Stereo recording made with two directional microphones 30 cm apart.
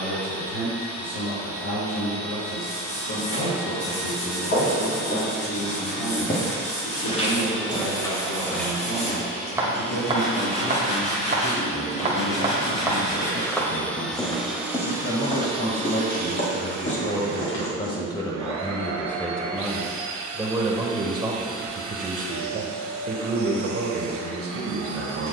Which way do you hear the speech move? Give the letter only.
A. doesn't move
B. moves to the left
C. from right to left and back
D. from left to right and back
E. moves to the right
E.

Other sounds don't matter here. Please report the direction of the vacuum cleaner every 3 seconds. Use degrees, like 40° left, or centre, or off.
50° left, 50° left, 40° left, 30° left, 10° left, 30° right, 70° right, 70° right, 70° right.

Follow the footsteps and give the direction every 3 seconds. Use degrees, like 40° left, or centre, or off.
off, 40° left, 20° left, 20° right, centre, 30° left, off, off, off.